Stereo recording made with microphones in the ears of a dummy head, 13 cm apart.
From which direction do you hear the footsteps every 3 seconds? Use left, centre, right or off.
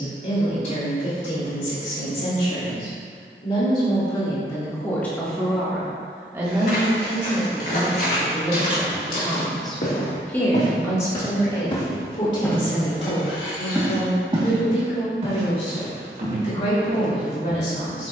off, off, left, left, centre, right.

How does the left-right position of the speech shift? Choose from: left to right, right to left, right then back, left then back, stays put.
right then back.